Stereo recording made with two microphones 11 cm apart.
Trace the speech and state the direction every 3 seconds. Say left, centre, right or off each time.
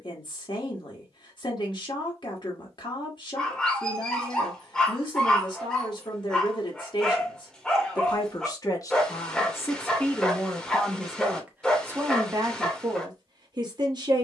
left, left, left, centre, right.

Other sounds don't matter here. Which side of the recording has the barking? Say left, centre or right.
centre.